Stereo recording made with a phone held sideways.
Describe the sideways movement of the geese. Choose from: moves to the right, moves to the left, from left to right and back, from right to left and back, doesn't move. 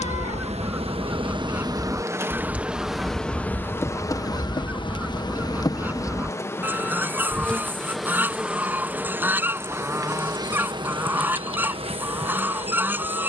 doesn't move.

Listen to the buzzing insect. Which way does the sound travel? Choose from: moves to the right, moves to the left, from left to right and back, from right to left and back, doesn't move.
from right to left and back.